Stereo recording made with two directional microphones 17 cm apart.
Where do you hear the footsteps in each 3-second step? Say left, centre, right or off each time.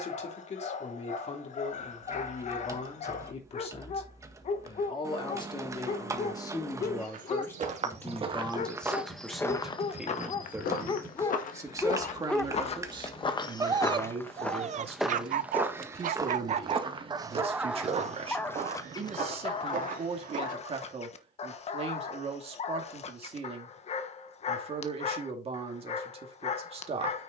off, off, right, left, left, right, right, off, off.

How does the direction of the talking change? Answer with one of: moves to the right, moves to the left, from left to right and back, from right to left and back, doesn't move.
moves to the right.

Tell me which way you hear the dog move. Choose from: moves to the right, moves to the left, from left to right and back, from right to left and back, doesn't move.
from left to right and back.